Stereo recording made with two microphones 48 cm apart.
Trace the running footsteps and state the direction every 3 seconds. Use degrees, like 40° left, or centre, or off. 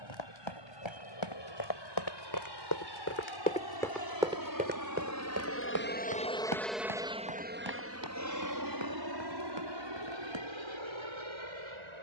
60° left, 10° right, 50° right, 60° right.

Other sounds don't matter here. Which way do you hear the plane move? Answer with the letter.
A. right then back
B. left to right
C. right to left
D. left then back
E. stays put
B.